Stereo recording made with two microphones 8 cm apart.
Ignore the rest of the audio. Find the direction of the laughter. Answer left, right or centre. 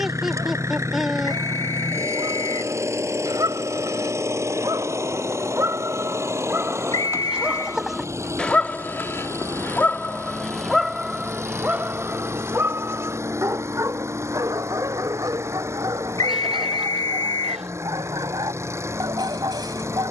centre.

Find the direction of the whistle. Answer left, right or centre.
left.